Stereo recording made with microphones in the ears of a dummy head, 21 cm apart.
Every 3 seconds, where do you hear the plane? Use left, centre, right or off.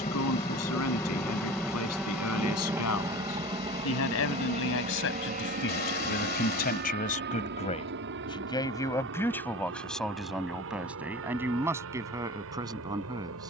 centre, right, right, right, right.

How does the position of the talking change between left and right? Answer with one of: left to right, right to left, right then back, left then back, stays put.
left to right.